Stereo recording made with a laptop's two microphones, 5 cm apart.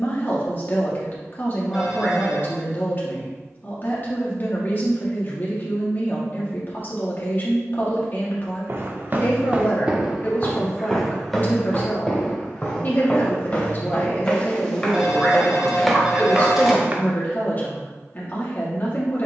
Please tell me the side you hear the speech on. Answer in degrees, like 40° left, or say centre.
40° left.